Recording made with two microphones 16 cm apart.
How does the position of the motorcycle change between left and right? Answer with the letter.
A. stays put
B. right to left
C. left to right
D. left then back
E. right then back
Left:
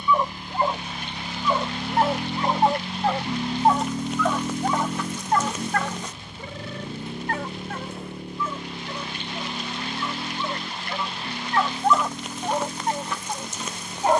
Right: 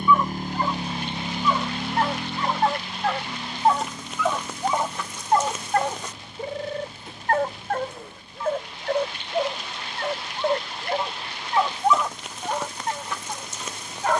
B.